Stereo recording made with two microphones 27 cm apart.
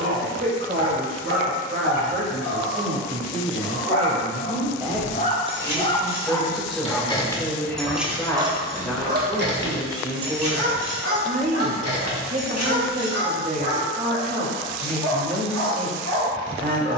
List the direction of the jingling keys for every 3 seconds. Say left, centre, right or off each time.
off, left, centre, right, right, off.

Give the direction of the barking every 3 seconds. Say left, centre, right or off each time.
left, left, centre, right, right, right.